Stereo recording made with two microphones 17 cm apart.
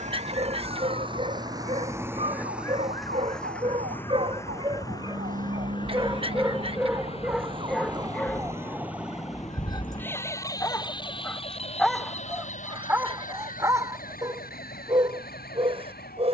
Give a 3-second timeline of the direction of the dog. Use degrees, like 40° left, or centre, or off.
40° right, 30° right, centre, 20° left, 20° right, 30° right.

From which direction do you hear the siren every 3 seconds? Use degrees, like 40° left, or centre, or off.
70° right, 60° right, 30° right, 20° left, 50° left, 60° left.